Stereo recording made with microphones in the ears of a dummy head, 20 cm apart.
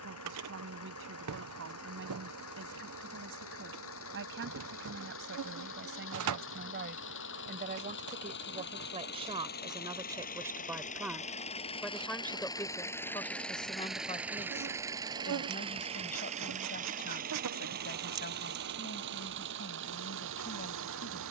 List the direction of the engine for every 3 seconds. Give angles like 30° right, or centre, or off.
70° left, 60° left, 50° left, 40° left, centre, 30° right, 50° right.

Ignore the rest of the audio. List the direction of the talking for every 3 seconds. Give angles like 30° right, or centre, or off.
60° right, 60° right, 40° right, 10° right, 20° left, 40° left, 50° left.